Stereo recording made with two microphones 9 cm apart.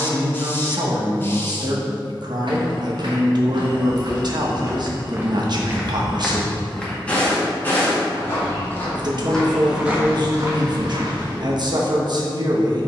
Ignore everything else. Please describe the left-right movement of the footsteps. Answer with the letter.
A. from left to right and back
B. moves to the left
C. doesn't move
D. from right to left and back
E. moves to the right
D.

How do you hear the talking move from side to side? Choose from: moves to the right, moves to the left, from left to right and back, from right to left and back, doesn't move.
doesn't move.